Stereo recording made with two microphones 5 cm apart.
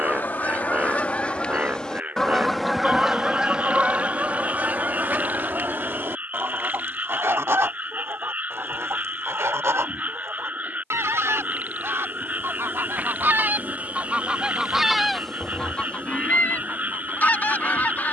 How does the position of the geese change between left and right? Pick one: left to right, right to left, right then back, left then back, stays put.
right then back.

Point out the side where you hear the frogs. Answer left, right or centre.
right.